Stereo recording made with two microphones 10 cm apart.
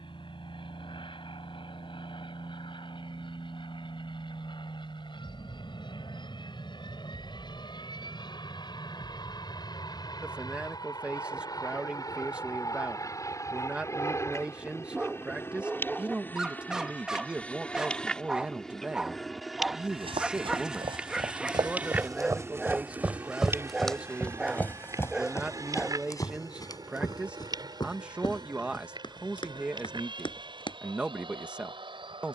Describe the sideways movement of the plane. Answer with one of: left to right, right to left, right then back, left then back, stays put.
left to right.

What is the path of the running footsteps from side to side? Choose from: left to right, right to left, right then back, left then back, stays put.
right to left.